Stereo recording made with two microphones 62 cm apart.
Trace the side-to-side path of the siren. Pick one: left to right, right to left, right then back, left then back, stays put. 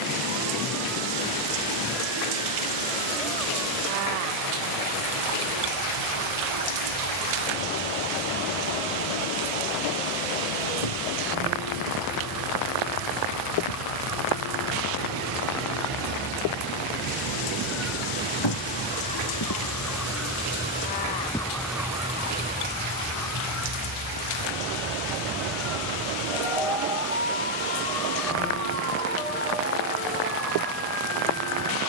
left to right.